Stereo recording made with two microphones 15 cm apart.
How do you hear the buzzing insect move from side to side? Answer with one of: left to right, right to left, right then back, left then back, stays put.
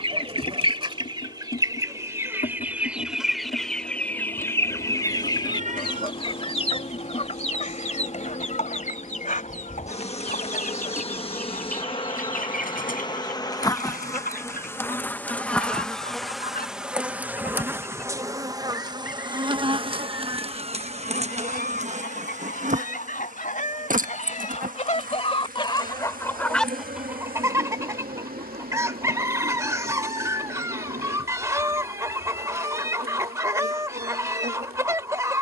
left to right.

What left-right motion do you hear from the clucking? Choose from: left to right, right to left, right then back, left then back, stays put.
left then back.